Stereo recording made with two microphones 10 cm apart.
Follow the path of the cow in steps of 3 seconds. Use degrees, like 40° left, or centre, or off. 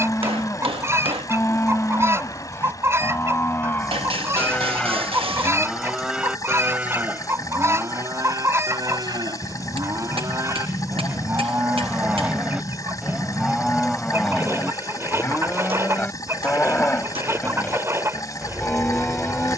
20° left, 10° left, 30° right, 30° right, centre, 20° left, 20° left.